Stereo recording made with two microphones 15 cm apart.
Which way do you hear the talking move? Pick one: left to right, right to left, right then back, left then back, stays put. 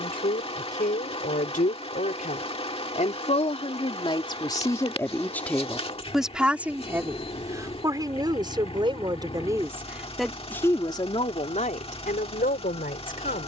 right then back.